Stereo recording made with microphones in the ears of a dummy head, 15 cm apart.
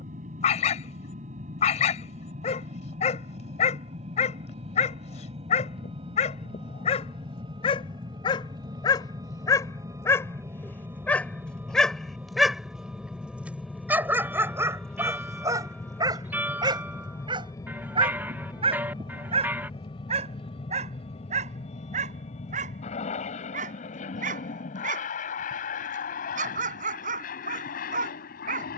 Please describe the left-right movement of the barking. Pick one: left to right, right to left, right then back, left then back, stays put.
left to right.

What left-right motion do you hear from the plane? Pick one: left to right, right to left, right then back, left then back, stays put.
right to left.